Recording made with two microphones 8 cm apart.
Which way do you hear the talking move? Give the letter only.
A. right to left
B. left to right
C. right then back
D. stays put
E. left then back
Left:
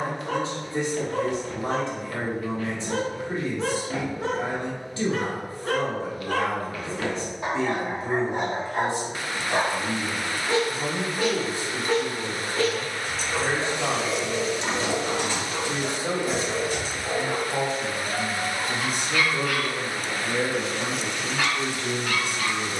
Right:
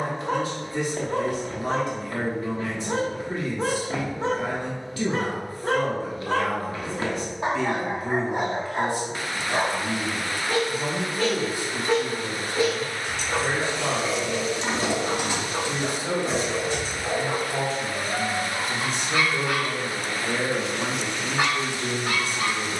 B.